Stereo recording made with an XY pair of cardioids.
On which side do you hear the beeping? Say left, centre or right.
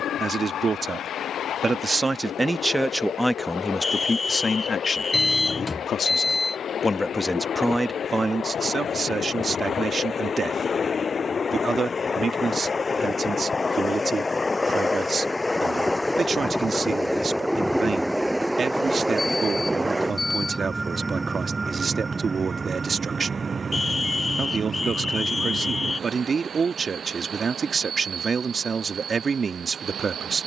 left.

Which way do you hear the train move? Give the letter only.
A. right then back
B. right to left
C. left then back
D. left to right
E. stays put
D.